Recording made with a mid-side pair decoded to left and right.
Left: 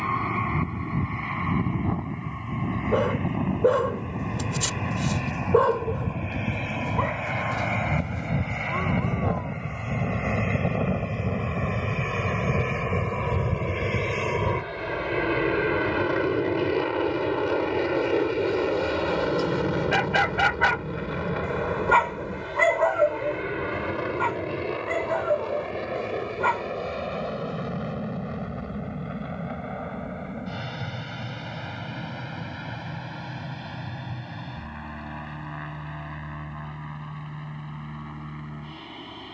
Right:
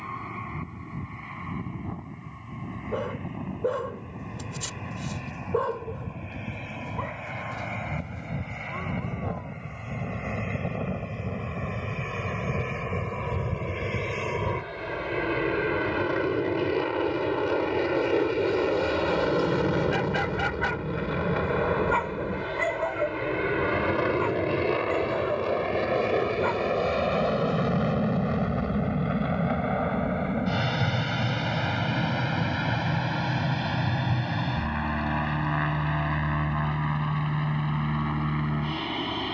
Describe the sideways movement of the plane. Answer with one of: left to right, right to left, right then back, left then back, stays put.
left to right.